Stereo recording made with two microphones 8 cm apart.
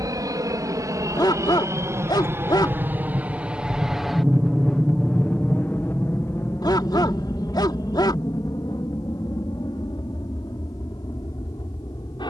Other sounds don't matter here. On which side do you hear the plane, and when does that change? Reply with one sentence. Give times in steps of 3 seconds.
You can hear the plane on the right from 0 s, in the centre from 3 s and on the left from 6 s.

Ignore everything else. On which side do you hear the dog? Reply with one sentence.
In this clip you hear the dog on the left.